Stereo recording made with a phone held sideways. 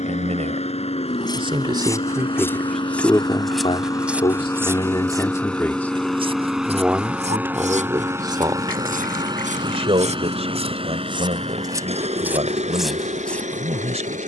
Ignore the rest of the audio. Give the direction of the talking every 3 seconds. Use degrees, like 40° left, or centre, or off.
30° right, 20° left, 20° right, 40° right, 40° right.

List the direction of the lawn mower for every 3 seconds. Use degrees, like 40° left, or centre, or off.
40° left, 20° left, 10° right, 30° right, 50° right.